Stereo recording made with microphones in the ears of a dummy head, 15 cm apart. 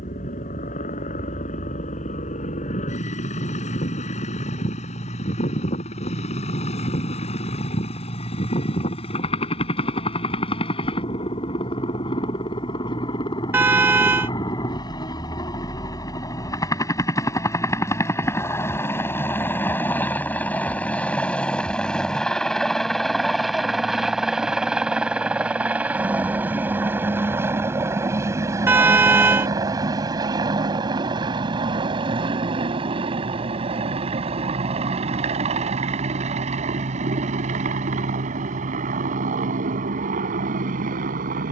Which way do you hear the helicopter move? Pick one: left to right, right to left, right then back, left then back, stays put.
left to right.